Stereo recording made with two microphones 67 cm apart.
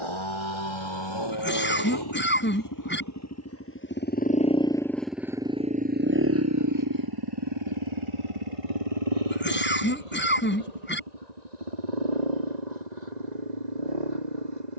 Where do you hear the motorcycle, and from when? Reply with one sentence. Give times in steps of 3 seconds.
In this clip you hear the motorcycle on the left from 0 s, in the centre from 3 s and on the right from 6 s.